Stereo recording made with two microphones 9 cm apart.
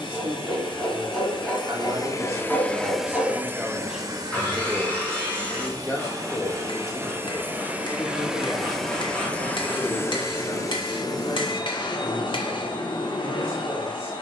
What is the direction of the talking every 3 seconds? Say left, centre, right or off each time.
right, centre, left, left, left.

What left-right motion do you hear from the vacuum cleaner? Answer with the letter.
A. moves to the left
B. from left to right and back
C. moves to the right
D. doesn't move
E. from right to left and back
B.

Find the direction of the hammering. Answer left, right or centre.
left.